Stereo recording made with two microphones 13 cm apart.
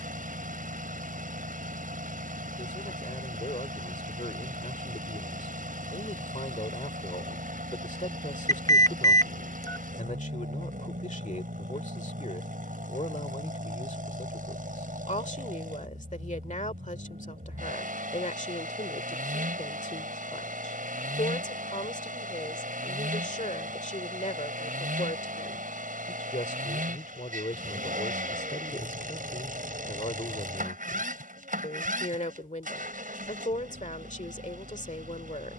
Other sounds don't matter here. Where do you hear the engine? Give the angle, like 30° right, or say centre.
80° right.